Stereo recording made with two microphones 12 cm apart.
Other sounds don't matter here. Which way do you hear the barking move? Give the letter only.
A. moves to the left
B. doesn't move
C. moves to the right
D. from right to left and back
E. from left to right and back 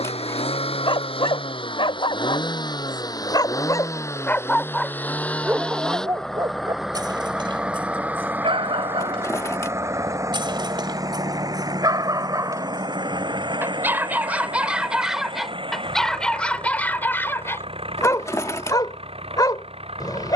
E.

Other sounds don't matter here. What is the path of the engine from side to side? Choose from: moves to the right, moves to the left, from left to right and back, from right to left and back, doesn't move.
moves to the right.